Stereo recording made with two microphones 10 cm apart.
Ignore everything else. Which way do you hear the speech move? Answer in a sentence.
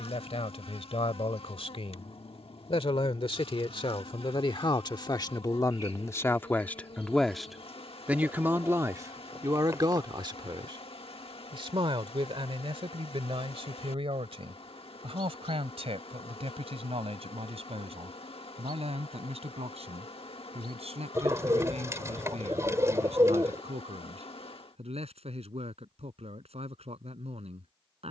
In this clip you hear the speech go from the left side to the right.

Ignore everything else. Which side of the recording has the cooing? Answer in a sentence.
You can hear the cooing on the right.